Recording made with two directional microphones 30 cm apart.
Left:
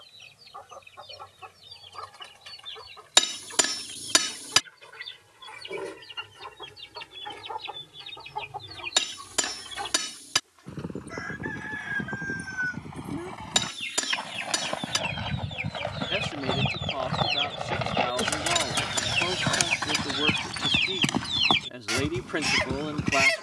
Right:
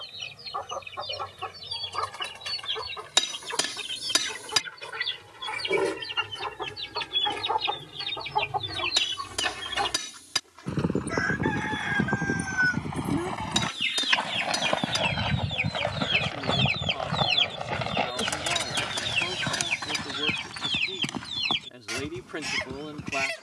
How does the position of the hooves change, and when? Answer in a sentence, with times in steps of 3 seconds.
In this clip you hear the hooves not at all from 0 s, on the right from 9 s, in the centre from 15 s and on the left from 18 s.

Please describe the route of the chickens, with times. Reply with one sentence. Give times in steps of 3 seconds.
In this clip you hear the chickens on the right from 0 s, in the centre from 18 s and on the left from 21 s.